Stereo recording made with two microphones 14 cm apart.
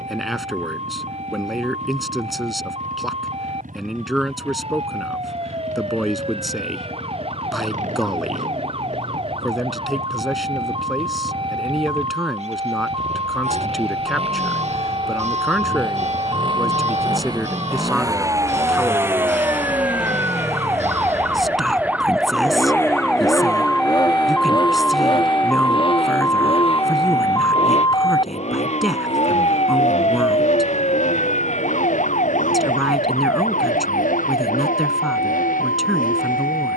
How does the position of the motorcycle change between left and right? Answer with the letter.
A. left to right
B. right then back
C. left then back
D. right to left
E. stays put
D.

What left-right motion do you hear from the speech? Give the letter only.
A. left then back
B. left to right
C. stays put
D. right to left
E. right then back
C.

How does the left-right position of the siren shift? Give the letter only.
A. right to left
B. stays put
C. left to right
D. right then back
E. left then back
A.